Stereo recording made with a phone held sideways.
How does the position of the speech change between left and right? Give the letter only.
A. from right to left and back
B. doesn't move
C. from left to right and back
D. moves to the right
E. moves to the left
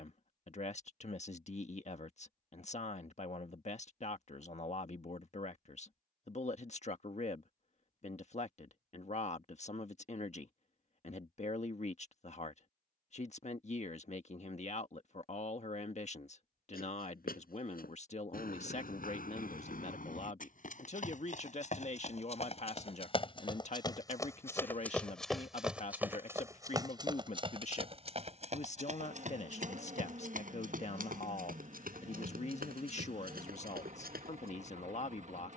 B.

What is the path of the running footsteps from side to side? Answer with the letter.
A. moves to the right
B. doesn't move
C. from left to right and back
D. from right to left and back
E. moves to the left
A.